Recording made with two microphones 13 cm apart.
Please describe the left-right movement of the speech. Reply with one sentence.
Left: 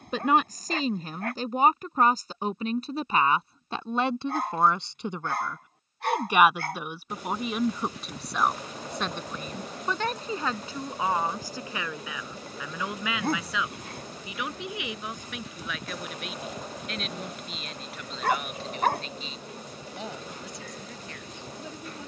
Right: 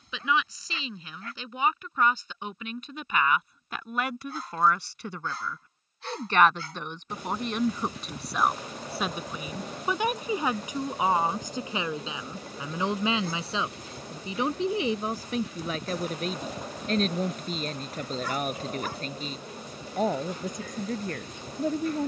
In this clip you hear the speech travel towards the right.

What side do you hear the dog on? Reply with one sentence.
You can hear the dog on the left.